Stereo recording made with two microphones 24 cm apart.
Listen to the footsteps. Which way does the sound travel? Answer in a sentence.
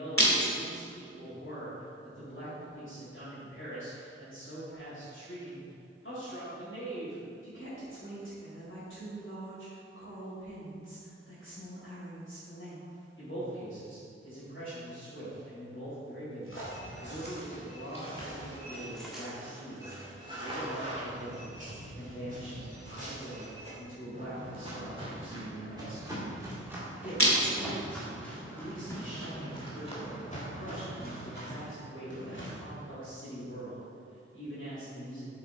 You can hear the footsteps move from left to right and back again.